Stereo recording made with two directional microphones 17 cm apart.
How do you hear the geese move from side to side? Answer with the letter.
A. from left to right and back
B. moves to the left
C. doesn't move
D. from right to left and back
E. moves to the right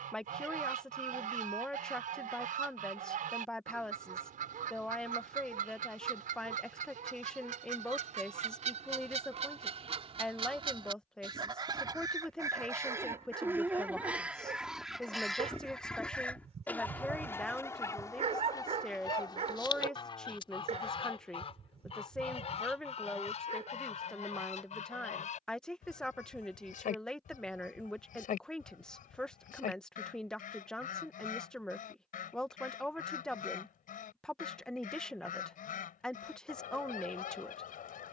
B.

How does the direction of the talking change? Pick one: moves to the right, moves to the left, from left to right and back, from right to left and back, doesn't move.
doesn't move.